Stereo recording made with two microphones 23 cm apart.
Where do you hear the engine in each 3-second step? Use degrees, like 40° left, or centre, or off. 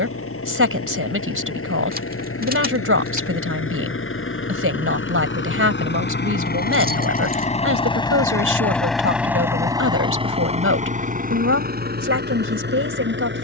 80° left, 60° left, 30° left, 30° right, 50° right.